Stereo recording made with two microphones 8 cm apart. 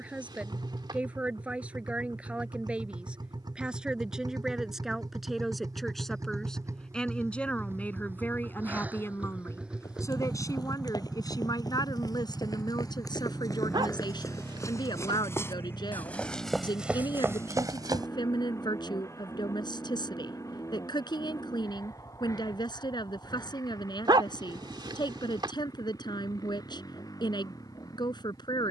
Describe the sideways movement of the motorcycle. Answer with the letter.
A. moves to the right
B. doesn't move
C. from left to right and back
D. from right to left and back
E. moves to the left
E.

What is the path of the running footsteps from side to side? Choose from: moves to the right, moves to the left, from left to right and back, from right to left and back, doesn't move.
moves to the right.